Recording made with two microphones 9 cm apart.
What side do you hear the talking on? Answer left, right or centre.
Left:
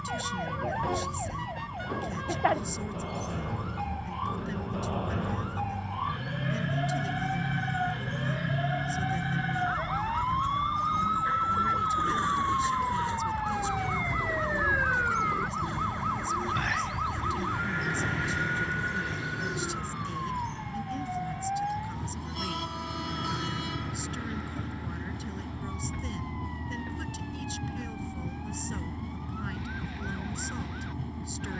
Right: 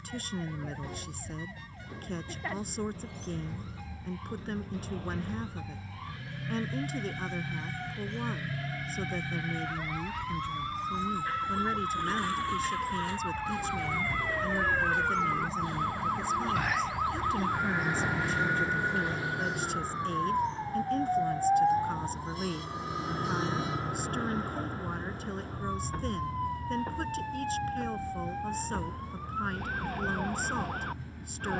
right.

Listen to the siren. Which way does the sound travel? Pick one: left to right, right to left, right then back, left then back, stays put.
left to right.